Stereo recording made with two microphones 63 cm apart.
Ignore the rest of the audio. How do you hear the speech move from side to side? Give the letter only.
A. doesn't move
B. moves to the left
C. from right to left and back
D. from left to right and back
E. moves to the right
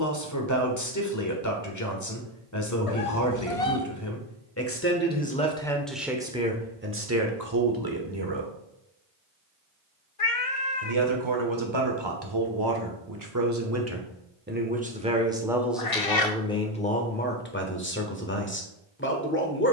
D.